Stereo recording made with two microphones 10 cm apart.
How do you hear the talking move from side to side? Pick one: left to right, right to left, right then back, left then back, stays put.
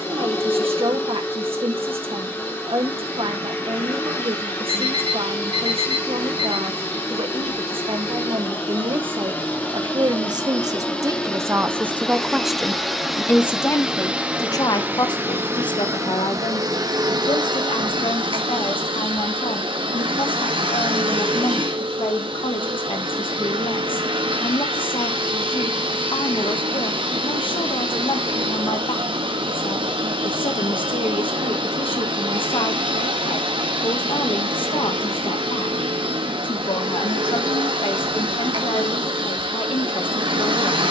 right to left.